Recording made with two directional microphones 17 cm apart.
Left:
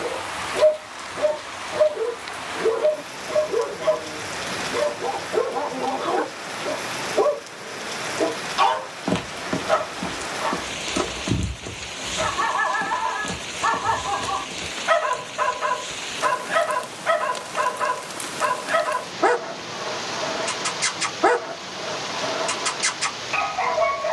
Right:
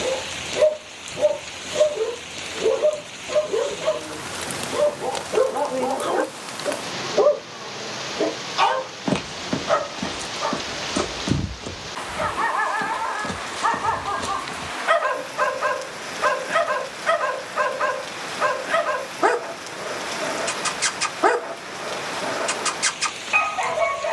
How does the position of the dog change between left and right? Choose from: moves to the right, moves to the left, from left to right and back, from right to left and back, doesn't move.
doesn't move.